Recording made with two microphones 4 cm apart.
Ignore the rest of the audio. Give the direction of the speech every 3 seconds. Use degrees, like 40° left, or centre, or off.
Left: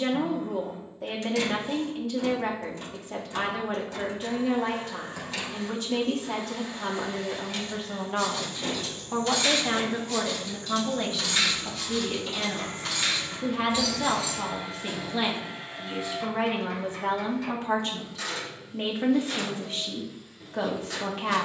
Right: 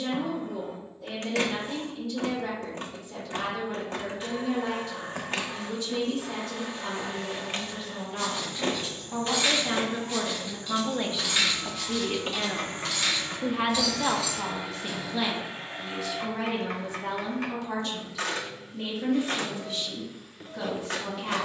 60° left, 60° left, 50° left, centre, 10° right, 30° left, 50° left.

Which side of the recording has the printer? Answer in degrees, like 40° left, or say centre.
50° right.